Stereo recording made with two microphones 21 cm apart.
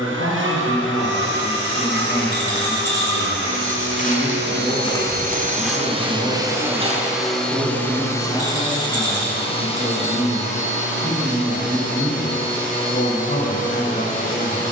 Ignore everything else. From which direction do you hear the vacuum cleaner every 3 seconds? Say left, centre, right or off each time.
right, right, centre, left, left.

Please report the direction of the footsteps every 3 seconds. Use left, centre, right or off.
left, left, right, off, off.